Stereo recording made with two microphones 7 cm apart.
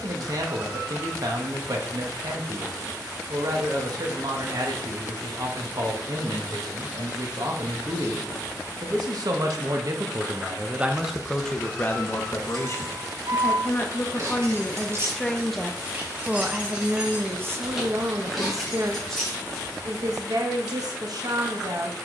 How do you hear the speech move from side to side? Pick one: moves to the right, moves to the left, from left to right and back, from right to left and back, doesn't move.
from right to left and back.